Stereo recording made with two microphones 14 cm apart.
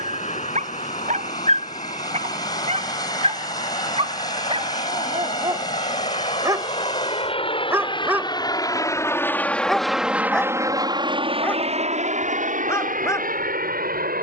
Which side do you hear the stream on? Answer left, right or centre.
left.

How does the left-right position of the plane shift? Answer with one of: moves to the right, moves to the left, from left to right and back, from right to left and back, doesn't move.
moves to the right.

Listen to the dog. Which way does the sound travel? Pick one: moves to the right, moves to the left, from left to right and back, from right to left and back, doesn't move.
moves to the left.